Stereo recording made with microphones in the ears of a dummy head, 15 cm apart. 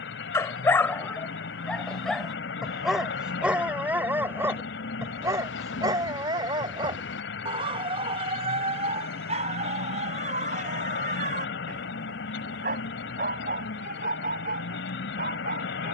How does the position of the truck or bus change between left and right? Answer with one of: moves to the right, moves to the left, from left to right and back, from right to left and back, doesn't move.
doesn't move.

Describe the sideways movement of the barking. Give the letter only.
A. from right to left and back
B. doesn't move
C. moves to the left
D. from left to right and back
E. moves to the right
E.